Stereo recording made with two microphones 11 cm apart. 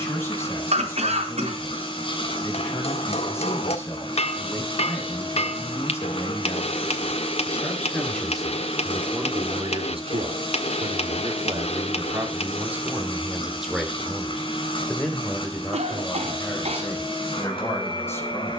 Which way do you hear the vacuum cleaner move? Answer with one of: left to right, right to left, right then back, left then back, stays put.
stays put.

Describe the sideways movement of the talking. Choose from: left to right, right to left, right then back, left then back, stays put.
right then back.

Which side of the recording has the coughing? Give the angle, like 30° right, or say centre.
70° right.